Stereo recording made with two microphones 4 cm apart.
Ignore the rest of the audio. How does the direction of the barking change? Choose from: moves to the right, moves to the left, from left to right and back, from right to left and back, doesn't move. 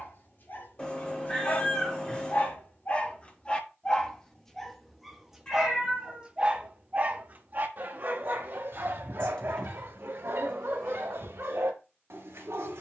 moves to the right.